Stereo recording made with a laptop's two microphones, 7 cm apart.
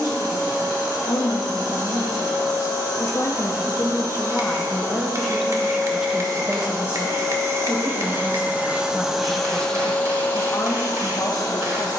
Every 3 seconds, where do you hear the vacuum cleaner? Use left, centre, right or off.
right, right, right, left.